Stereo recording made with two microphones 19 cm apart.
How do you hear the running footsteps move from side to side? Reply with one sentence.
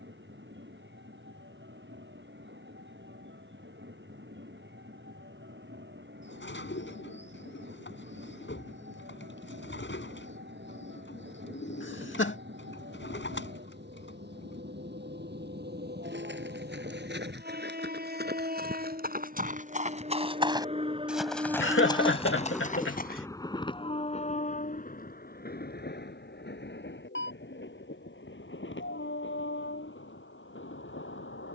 You can hear the running footsteps go from the right side to the left.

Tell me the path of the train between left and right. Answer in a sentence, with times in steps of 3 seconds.
In this clip you hear the train on the right from 0 s, in the centre from 21 s and on the left from 24 s.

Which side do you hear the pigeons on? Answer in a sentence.
In this clip you hear the pigeons on the left.